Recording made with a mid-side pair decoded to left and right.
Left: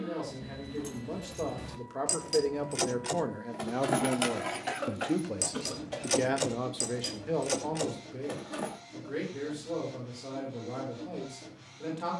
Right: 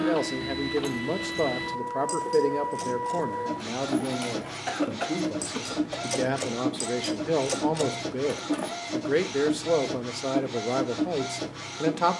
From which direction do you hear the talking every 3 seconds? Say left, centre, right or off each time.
right, centre, right, right.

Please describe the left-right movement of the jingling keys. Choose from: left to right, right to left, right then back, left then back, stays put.
left then back.